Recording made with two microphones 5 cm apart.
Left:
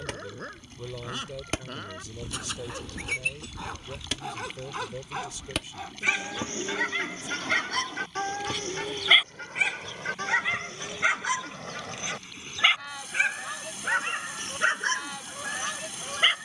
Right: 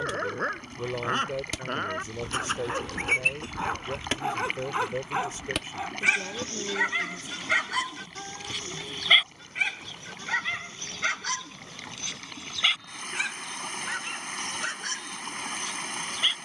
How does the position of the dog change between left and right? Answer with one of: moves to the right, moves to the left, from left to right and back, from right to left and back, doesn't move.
moves to the left.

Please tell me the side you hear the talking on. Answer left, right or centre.
right.